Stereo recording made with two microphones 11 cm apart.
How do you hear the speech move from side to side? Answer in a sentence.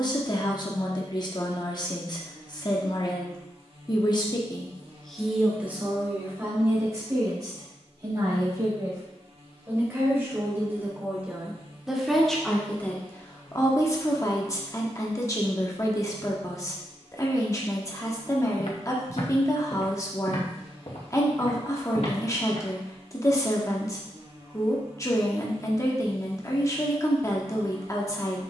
You can hear the speech move from left to right and back again.